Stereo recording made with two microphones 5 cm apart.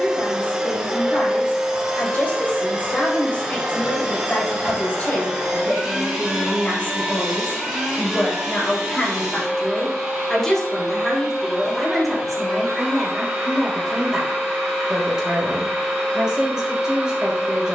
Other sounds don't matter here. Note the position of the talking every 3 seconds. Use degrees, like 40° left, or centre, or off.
40° left, 40° left, 30° left, 10° left, centre, 10° right.